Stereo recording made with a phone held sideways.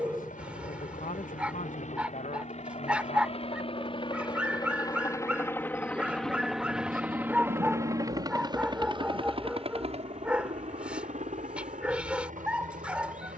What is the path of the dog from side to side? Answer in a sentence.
You can hear the dog stay in one place.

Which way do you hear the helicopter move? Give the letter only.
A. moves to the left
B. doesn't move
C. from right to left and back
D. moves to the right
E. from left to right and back
D.